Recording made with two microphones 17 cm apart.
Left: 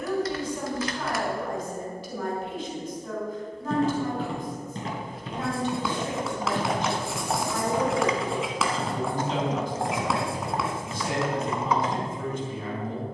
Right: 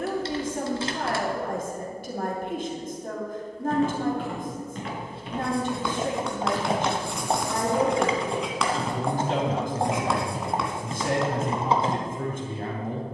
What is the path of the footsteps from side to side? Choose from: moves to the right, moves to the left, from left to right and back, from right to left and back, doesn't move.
moves to the right.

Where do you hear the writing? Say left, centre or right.
centre.